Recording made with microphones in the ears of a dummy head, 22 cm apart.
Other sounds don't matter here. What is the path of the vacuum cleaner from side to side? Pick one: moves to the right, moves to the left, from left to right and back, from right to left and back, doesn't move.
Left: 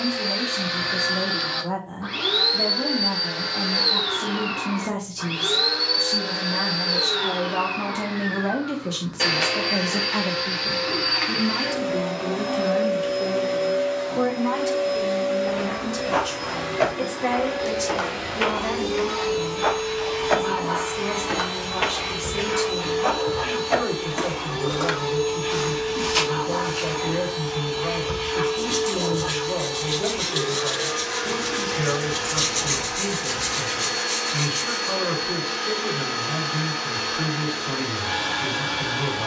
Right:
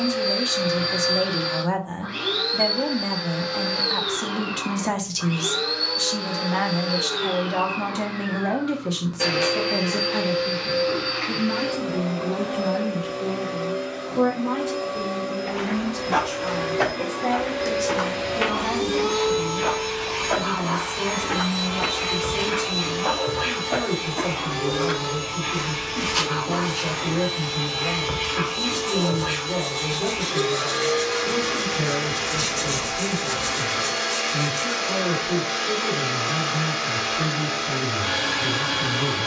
moves to the right.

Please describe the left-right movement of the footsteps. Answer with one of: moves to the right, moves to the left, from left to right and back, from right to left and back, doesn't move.
from right to left and back.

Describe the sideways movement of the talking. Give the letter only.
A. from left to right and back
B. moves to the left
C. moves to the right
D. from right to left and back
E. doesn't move
B.